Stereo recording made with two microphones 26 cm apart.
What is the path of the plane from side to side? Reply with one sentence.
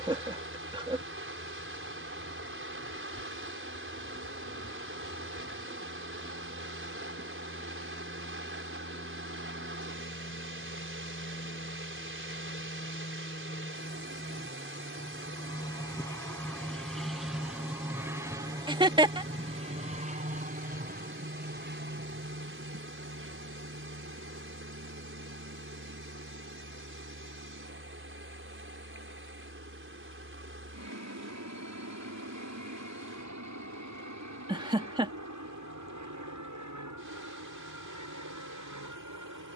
You can hear the plane travel towards the right.